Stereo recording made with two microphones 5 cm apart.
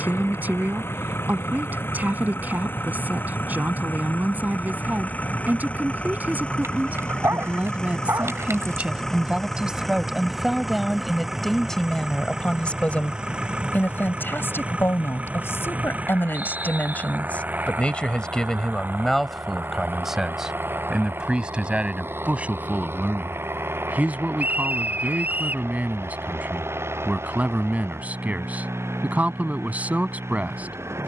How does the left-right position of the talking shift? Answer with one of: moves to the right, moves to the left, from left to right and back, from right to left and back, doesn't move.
from right to left and back.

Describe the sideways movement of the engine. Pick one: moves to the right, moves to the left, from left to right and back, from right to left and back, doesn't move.
moves to the right.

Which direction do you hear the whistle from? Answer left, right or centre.
right.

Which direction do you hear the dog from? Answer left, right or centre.
right.